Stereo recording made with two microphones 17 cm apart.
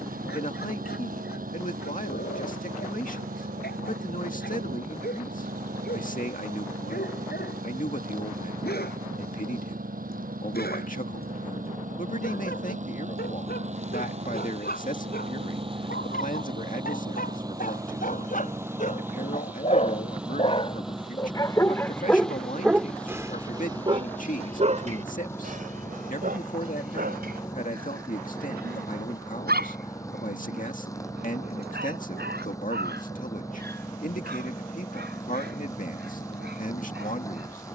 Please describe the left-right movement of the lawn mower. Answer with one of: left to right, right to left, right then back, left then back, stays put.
right to left.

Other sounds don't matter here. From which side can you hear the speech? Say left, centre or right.
left.